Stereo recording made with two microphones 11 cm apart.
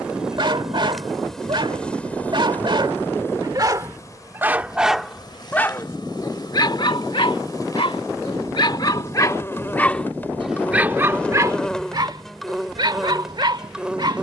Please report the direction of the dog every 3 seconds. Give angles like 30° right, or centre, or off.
50° right, 10° right, 50° left, centre, 40° right.